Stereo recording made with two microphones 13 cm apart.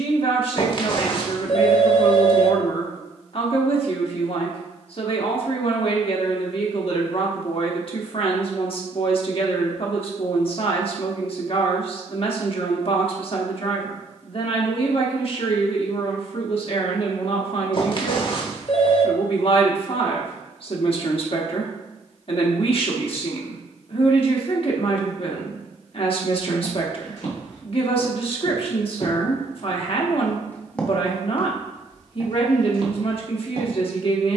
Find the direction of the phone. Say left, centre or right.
left.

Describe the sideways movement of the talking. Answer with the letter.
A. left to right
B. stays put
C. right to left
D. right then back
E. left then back
B.